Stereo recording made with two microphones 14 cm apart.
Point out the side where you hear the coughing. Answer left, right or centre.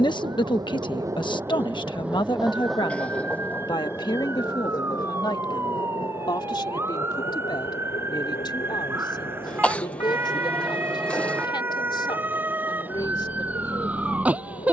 centre.